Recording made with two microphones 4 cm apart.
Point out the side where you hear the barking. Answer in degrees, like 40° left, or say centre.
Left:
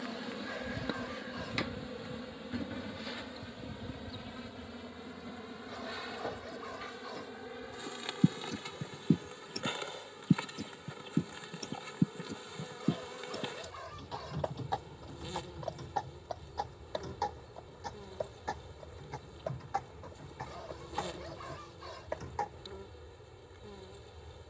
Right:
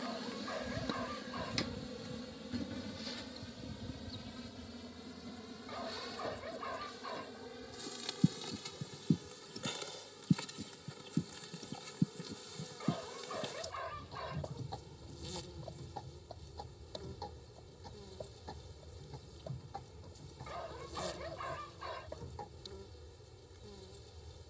20° right.